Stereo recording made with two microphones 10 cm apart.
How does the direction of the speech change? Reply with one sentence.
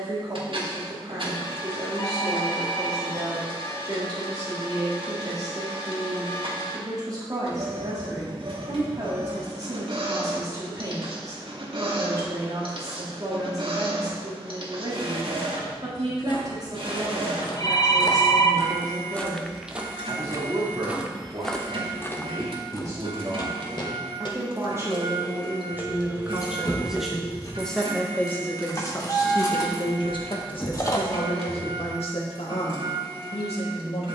In this clip you hear the speech travel towards the left.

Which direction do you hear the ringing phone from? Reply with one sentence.
You can hear the ringing phone on the left.